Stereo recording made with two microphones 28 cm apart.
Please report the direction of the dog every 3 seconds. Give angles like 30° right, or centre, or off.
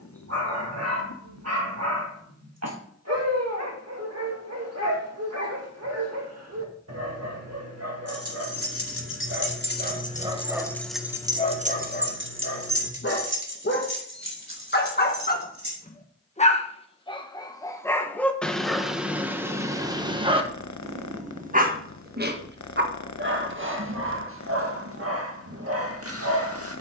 60° right, 60° right, 60° right, 10° right, 40° left, 20° left, 10° right, 40° right, 50° right.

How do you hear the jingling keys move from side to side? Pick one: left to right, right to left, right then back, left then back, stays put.
left to right.